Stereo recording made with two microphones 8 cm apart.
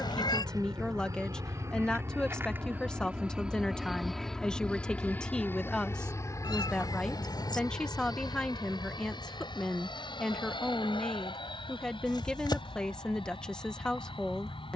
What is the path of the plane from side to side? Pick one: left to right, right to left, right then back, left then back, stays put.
right to left.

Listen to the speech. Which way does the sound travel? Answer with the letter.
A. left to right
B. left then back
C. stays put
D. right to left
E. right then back
C.